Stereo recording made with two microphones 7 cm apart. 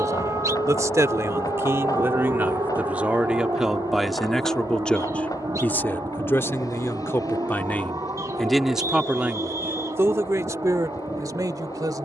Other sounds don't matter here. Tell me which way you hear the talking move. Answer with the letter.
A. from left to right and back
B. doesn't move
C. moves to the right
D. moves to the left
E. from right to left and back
E.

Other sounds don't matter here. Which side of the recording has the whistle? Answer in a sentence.
In this clip you hear the whistle on the right.